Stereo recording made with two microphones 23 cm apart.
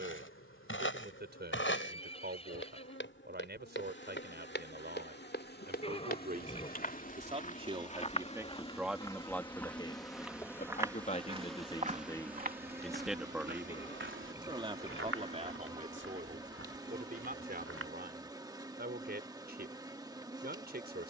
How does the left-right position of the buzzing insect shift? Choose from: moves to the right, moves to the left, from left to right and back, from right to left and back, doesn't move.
moves to the right.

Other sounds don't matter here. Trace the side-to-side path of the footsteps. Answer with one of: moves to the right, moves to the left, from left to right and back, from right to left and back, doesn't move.
moves to the right.